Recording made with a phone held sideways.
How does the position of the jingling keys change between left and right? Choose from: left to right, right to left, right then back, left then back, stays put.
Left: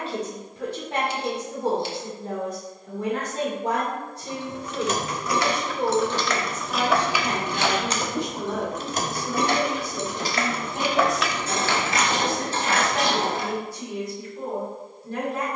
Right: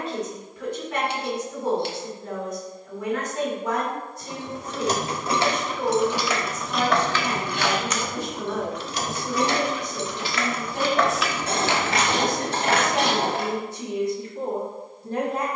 left then back.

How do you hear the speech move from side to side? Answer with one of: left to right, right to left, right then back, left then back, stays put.
left to right.